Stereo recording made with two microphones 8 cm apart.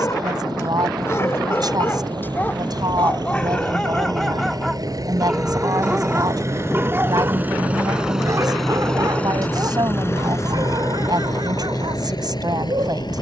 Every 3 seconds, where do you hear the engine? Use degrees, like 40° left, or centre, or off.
70° right, 50° right, 20° right, 40° left, 60° left.